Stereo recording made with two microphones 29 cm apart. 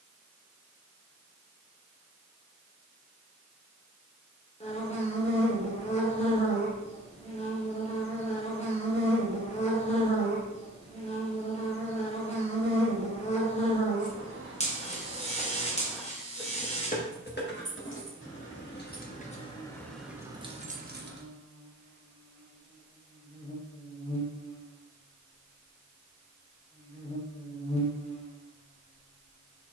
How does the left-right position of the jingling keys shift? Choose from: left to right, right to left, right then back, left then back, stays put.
left then back.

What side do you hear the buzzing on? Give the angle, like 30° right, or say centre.
20° left.